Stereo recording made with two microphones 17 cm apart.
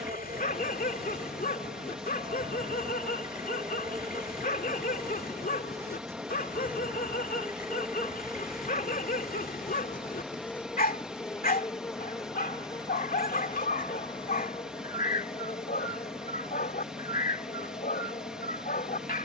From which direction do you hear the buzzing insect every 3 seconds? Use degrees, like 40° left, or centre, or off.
40° right, 20° right, 10° right, 10° left, 30° left, 40° left, 50° left.